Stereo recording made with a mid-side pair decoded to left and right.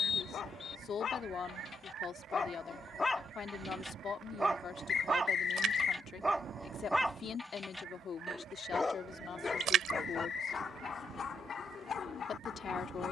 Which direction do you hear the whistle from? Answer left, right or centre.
left.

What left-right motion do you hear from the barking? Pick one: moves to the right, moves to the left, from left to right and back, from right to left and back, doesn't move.
from left to right and back.